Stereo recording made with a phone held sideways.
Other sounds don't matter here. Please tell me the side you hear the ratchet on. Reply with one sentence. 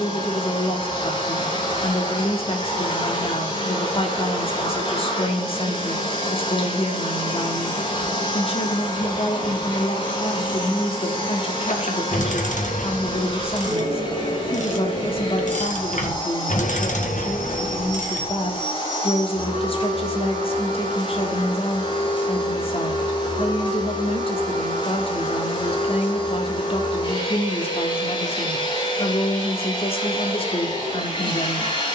You can hear the ratchet on the left.